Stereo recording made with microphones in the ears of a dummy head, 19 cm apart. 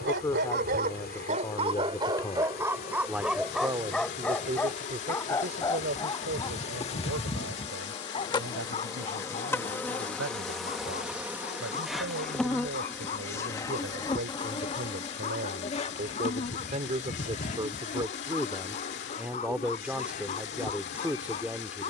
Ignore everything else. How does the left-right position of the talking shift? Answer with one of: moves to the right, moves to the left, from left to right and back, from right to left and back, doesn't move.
from left to right and back.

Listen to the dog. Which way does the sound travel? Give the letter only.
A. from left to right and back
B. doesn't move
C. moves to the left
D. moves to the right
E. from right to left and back
C.